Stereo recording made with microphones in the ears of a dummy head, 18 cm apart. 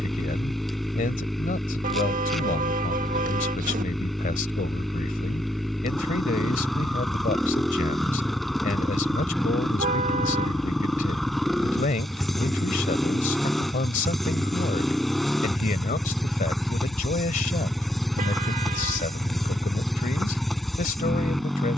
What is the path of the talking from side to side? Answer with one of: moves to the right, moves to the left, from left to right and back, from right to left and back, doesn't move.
doesn't move.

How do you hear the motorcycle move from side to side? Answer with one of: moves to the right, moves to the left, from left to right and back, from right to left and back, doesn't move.
doesn't move.